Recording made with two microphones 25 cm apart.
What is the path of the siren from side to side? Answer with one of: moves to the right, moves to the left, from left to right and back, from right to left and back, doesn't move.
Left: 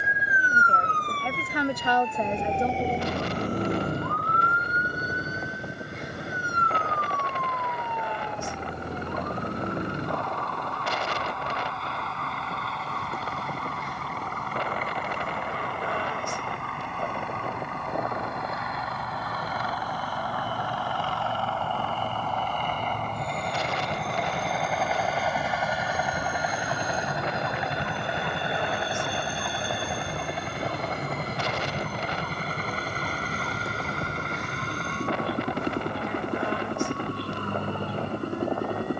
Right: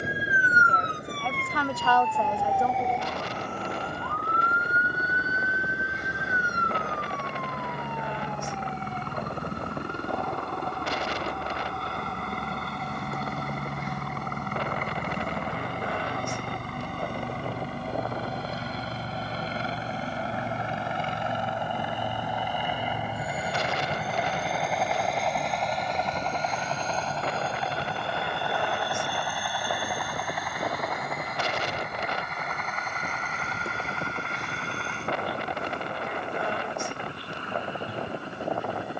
moves to the left.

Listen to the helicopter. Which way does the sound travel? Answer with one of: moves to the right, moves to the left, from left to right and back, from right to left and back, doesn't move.
moves to the left.